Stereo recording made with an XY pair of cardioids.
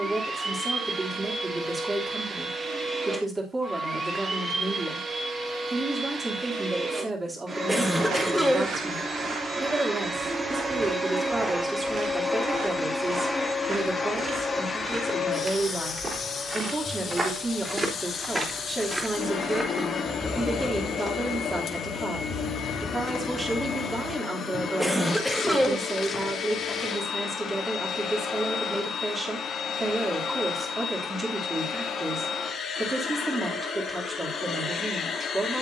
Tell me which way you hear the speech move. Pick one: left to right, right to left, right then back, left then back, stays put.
stays put.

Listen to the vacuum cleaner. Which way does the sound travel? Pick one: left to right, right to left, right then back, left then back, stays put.
right to left.